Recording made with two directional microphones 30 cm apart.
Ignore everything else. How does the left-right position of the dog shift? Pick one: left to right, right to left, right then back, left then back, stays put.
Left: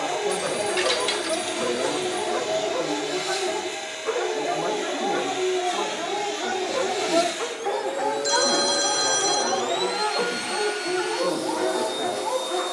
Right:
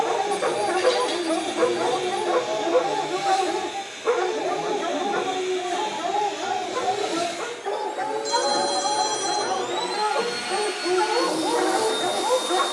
left then back.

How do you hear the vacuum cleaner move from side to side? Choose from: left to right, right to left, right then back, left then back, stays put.
left to right.